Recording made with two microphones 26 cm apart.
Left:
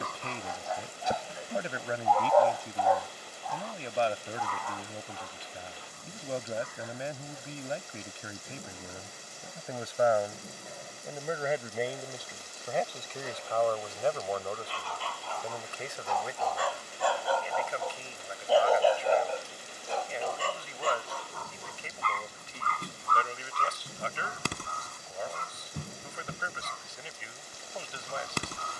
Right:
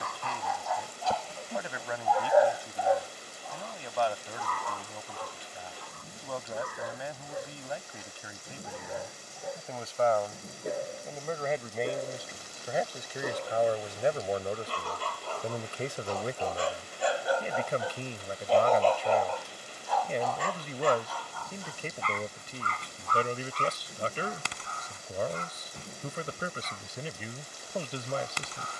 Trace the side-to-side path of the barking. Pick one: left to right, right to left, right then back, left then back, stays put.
right then back.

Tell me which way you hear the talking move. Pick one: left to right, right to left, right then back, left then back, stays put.
left to right.